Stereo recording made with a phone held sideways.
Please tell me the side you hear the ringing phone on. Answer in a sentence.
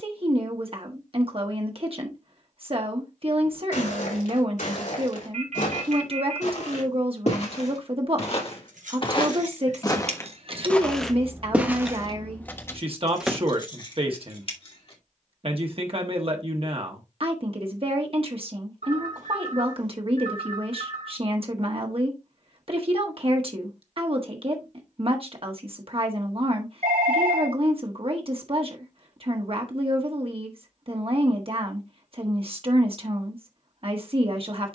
In this clip you hear the ringing phone on the right.